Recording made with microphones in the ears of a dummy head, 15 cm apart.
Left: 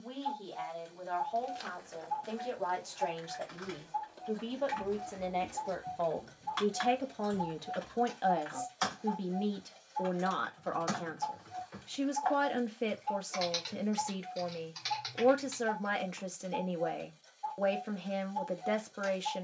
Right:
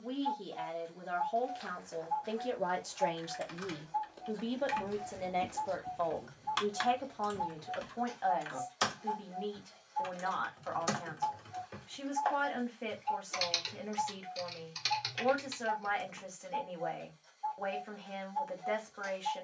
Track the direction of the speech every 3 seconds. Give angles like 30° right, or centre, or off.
30° right, 10° right, 30° left, 50° left, 50° left, 50° left, 50° left.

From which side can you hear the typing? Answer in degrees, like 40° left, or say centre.
40° right.